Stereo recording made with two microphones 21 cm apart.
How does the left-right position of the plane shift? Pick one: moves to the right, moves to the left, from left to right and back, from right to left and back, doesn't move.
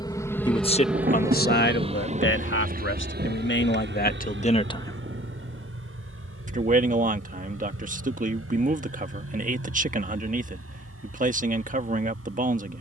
moves to the right.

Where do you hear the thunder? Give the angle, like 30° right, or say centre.
40° right.